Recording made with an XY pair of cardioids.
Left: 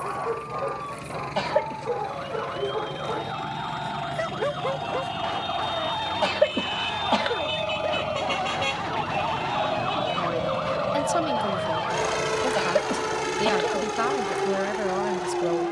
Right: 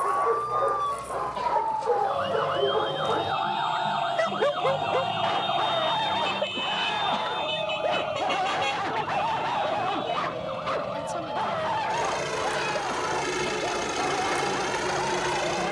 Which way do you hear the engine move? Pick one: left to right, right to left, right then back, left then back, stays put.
left to right.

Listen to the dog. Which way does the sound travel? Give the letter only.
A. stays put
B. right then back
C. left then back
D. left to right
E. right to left
A.